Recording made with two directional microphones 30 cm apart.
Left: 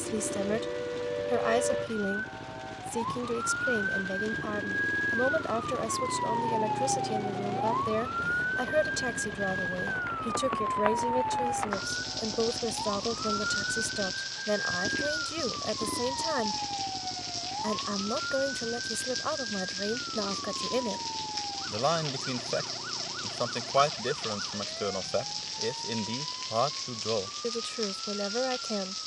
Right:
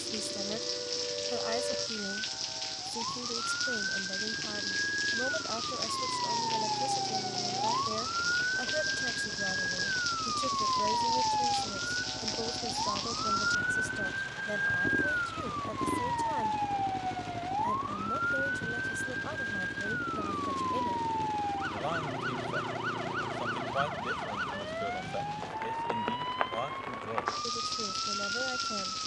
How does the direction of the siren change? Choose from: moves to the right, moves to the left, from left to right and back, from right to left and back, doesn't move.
moves to the right.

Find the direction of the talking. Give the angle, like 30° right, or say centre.
60° left.